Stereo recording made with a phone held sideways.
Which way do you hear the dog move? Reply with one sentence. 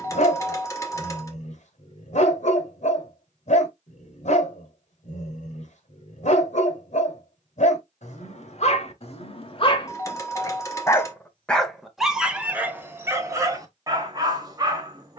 In this clip you hear the dog go from the left side to the right.